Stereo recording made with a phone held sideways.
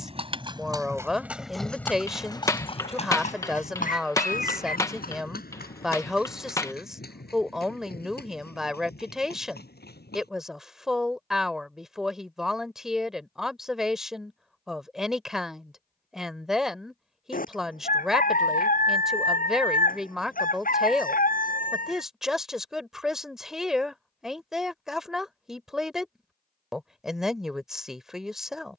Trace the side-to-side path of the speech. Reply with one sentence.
In this clip you hear the speech stay put.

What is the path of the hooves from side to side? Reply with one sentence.
You can hear the hooves move from right to left.